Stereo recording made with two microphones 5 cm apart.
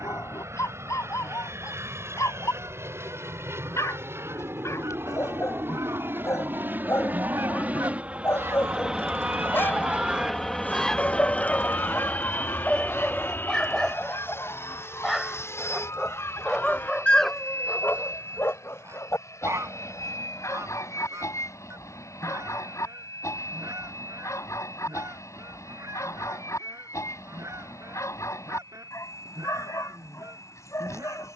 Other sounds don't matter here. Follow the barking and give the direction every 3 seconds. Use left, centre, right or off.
left, left, left, left, centre, centre, left, left, left, left, left.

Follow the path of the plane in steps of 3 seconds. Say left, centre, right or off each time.
right, right, right, centre, left, left, left, left, left, left, left.